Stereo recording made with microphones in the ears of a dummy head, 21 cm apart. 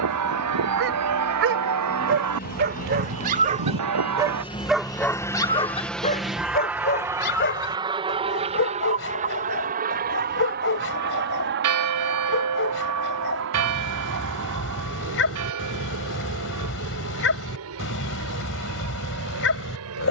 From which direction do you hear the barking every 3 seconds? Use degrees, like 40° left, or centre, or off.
60° right, 10° right, 50° left, 60° left, 60° left, 60° left, 60° left.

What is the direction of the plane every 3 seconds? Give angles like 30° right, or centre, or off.
50° left, 20° left, 20° right, 40° right, 50° right, 60° right, 70° right.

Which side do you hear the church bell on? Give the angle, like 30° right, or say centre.
90° right.